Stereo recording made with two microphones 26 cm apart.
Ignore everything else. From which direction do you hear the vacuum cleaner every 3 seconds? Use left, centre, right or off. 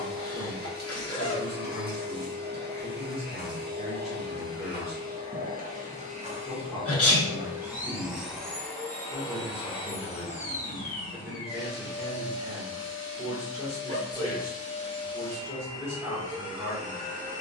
right, right, centre, left, left, centre.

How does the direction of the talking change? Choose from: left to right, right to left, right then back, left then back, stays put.
stays put.